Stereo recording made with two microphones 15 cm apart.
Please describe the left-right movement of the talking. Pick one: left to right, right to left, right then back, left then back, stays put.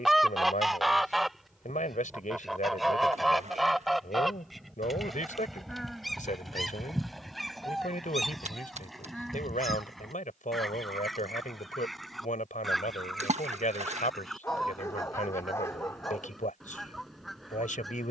stays put.